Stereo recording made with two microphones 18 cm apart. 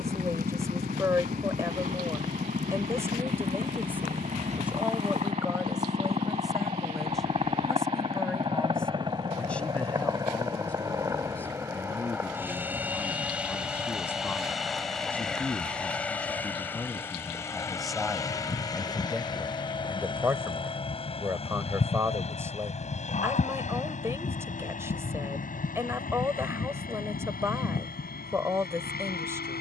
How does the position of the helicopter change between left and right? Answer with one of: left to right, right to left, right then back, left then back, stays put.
right to left.